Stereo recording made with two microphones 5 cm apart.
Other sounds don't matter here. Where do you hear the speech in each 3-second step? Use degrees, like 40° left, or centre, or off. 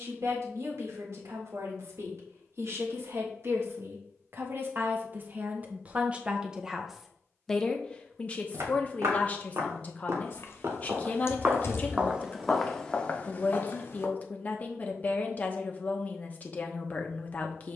60° right, 50° right, 10° left, 30° left, 30° left, 30° left.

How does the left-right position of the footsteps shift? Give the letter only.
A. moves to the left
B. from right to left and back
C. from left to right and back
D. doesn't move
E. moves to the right
A.